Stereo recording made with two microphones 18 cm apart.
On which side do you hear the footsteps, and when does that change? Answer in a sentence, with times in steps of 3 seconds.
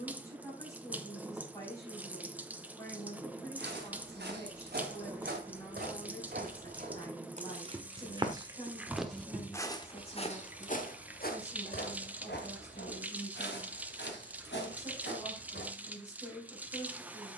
You can hear the footsteps not at all from 0 s, on the right from 3 s and on the left from 9 s.